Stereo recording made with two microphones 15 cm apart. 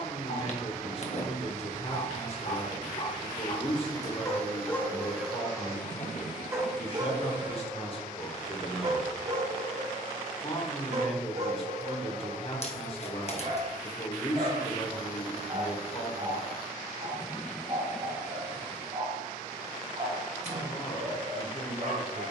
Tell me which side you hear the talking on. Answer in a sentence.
You can hear the talking on the left.